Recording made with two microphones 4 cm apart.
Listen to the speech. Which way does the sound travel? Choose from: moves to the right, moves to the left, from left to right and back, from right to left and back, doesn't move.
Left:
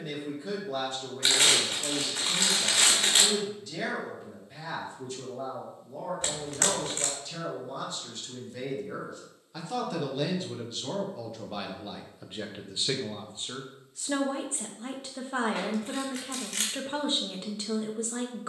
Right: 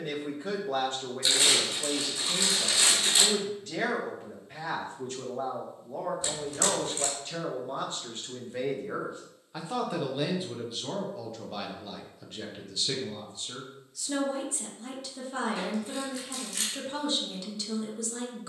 moves to the left.